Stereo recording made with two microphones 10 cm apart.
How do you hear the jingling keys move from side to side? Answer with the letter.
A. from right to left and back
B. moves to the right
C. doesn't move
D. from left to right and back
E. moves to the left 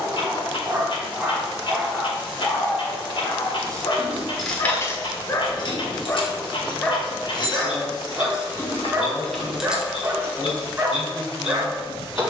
A.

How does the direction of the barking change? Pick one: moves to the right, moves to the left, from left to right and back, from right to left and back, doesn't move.
from right to left and back.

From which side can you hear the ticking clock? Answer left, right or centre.
left.